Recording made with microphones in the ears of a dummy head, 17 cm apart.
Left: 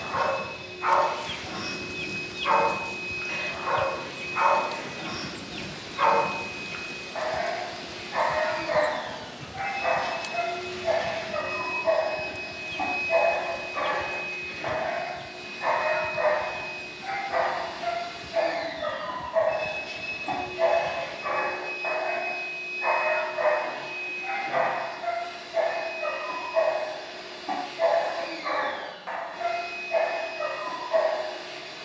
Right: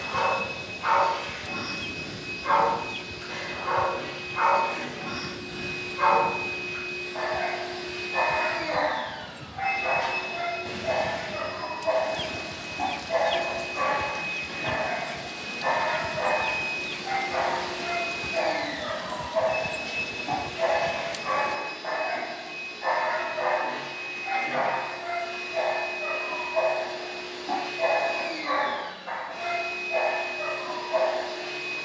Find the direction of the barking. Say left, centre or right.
left.